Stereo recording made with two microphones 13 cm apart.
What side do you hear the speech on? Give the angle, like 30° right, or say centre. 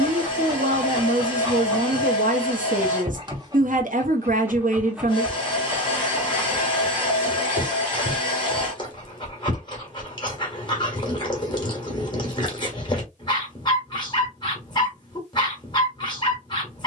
70° right.